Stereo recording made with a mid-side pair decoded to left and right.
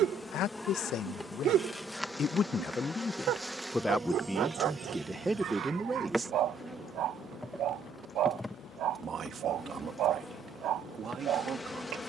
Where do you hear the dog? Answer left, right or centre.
right.